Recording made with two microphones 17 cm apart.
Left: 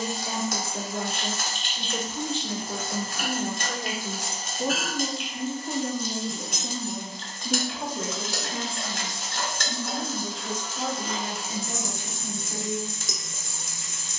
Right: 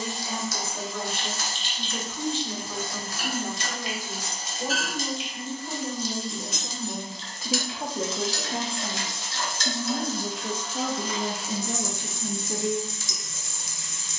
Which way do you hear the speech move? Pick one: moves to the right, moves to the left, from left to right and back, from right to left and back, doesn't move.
moves to the right.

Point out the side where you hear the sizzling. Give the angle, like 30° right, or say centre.
50° left.